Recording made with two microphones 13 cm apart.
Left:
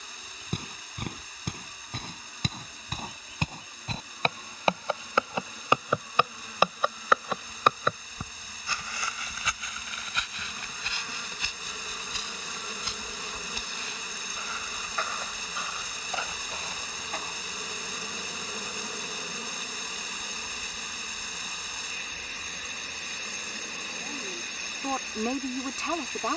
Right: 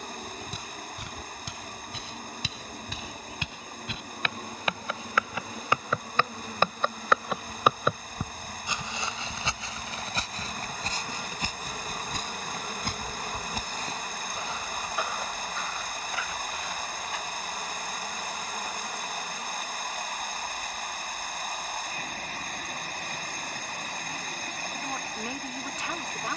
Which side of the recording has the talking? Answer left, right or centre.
left.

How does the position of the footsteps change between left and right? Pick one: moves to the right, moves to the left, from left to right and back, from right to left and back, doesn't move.
from left to right and back.